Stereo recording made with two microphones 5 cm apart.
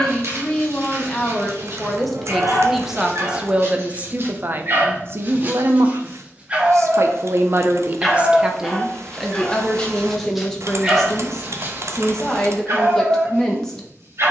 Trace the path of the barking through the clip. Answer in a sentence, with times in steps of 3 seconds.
In this clip you hear the barking on the right from 0 s, in the centre from 6 s and on the right from 12 s.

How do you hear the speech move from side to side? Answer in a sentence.
You can hear the speech move from left to right and back again.